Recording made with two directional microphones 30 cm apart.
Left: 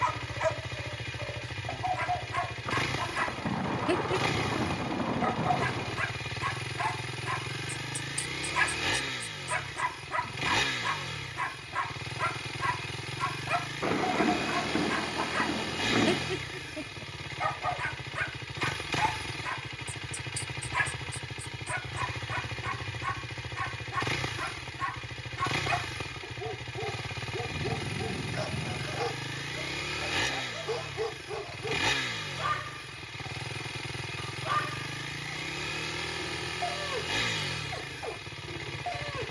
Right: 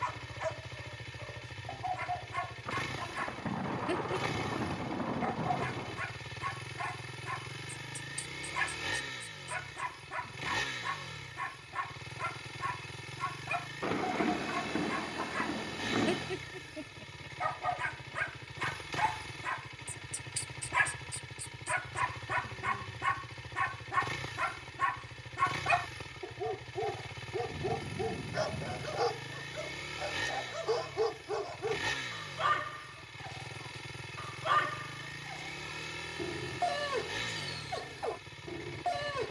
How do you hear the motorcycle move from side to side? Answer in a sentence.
You can hear the motorcycle stay in one place.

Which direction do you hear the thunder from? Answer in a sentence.
In this clip you hear the thunder on the left.